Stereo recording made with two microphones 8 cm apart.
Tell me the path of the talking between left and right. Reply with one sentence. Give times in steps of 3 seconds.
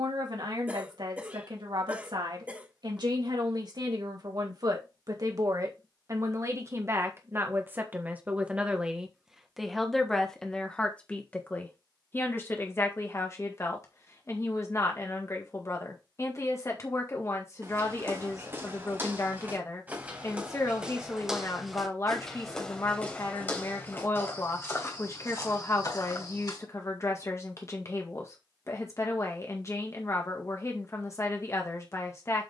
You can hear the talking on the right from 0 s, in the centre from 9 s and on the left from 12 s.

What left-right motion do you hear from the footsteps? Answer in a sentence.
You can hear the footsteps move to the left.